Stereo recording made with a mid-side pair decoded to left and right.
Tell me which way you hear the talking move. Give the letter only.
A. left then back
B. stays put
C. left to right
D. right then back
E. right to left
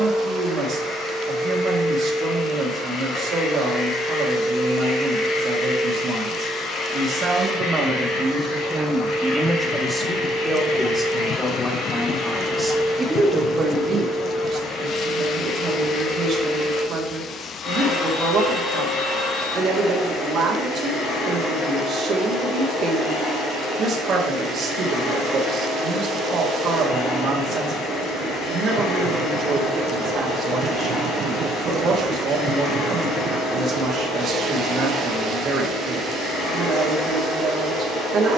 A.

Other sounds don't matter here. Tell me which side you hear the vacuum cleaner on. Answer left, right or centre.
left.